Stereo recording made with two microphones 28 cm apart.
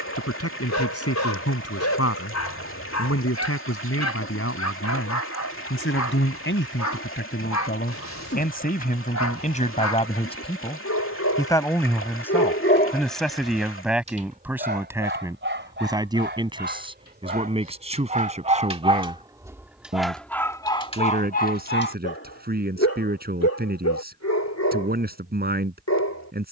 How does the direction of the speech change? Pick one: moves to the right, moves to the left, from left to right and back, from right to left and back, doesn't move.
moves to the right.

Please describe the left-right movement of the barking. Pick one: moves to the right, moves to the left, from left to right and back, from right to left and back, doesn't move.
from left to right and back.